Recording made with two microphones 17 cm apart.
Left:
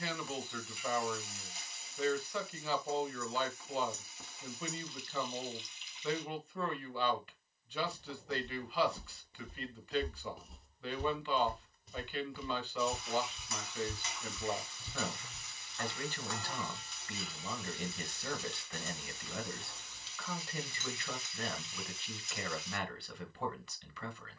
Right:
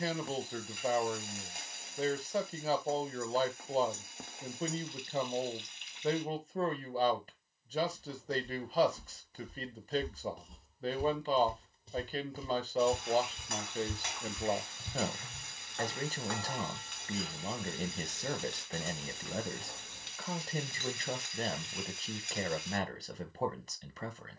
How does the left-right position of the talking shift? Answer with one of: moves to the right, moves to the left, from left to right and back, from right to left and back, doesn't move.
doesn't move.